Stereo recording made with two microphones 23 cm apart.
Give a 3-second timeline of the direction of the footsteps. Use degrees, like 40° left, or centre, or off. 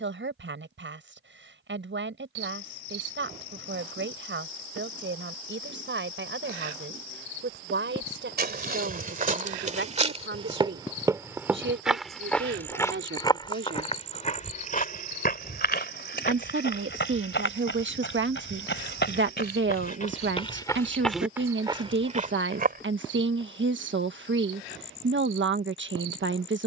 off, off, 40° right, 20° right, 20° left, 50° left, 40° left, 30° right, off.